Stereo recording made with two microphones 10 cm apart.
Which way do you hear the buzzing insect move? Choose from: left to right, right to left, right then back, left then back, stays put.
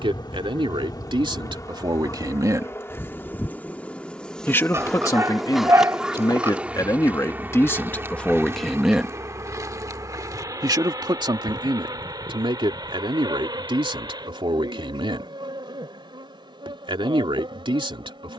left to right.